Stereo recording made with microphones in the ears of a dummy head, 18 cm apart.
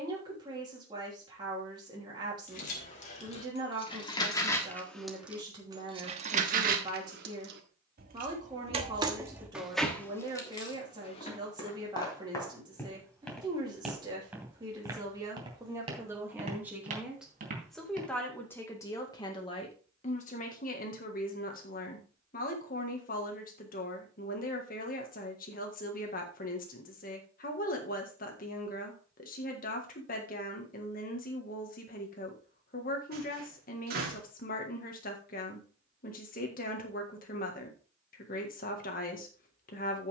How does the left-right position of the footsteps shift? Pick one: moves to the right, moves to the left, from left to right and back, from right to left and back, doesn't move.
moves to the right.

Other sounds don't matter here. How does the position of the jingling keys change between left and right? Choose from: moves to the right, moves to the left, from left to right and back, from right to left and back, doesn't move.
from left to right and back.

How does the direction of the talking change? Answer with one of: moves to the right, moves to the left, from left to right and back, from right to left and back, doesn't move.
moves to the left.